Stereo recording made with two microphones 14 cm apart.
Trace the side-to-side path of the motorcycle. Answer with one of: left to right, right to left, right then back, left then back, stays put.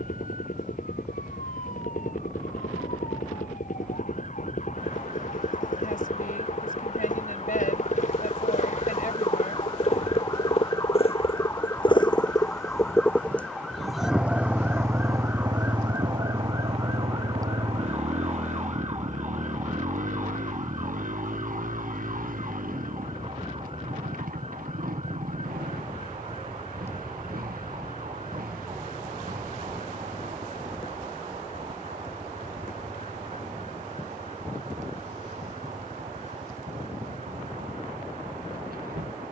left to right.